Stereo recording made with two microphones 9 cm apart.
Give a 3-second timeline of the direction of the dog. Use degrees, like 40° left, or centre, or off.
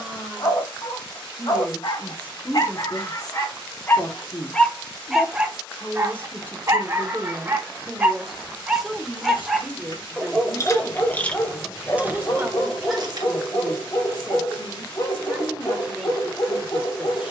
50° left, 20° left, 20° right, 10° left, 40° left, 50° left.